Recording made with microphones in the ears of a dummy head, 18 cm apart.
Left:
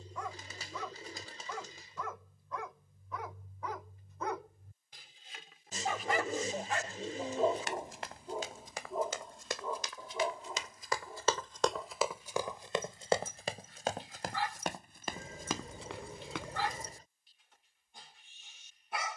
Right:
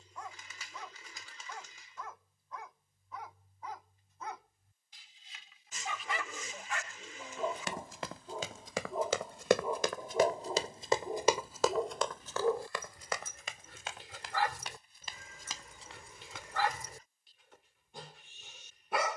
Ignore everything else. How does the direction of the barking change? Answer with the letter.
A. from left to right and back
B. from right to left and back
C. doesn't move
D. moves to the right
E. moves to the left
D.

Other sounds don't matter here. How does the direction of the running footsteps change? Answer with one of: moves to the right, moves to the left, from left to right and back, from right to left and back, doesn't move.
moves to the left.